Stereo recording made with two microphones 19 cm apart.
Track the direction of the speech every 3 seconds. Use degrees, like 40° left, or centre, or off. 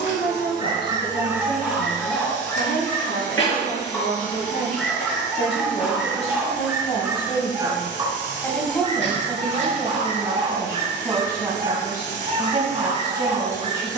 60° left, 50° left, 20° left, 10° right, 20° right.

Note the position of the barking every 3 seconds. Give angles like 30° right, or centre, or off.
centre, 10° left, 20° right, 40° right, 40° right.